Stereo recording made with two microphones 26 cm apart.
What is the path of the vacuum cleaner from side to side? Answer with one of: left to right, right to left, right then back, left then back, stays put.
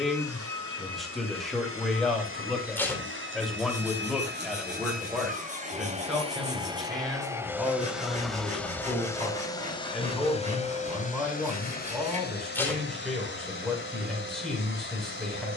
right to left.